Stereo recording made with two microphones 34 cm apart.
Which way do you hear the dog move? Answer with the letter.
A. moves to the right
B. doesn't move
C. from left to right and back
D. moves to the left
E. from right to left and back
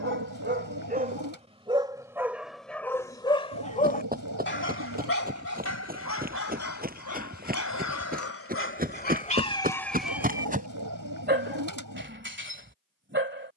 E.